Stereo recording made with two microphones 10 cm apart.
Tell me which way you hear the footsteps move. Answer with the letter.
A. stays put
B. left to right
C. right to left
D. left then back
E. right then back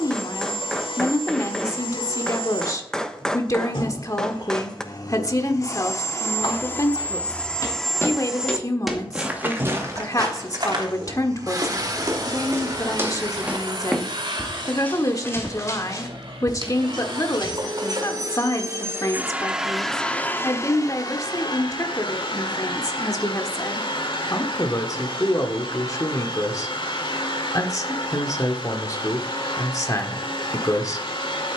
E.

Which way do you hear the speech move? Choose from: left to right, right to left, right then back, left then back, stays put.
stays put.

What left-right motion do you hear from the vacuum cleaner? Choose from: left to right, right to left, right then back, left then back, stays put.
right then back.